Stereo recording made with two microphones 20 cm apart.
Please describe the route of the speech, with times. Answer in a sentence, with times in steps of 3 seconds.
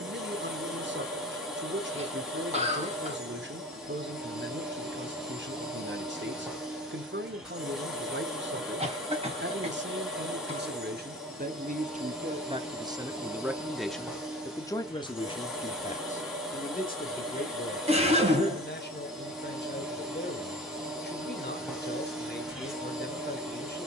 You can hear the speech on the right from 0 s, in the centre from 12 s and on the left from 15 s.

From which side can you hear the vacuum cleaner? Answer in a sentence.
You can hear the vacuum cleaner in the centre.